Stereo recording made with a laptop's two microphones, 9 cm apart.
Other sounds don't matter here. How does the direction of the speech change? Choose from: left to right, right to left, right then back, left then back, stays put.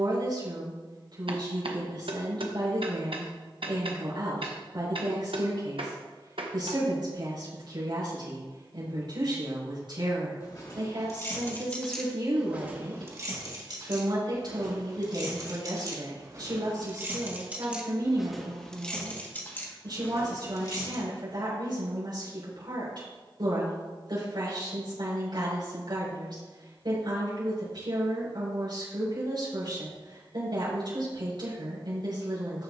stays put.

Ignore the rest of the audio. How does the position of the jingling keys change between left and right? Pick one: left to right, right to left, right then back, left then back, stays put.
right then back.